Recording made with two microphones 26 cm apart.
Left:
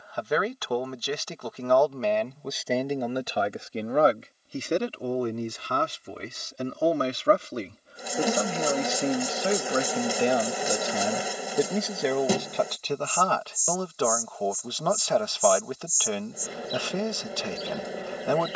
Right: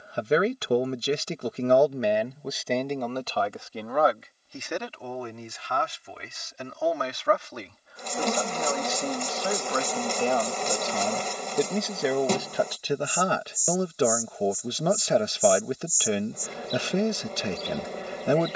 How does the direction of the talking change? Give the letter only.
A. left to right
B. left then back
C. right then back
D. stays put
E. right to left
B.